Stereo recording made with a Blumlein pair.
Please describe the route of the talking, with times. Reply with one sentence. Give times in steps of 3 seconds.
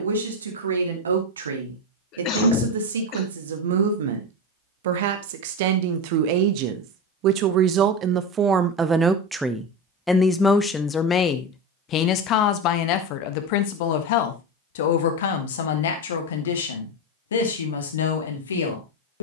In this clip you hear the talking on the right from 0 s, in the centre from 9 s and on the left from 12 s.